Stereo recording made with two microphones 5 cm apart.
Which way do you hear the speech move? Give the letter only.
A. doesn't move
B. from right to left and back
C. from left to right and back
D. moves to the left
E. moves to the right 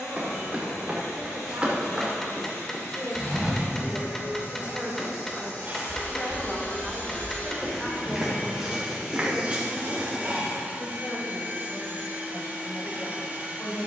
D.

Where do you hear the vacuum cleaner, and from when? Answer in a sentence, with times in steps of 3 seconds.
In this clip you hear the vacuum cleaner on the left from 0 s and on the right from 9 s.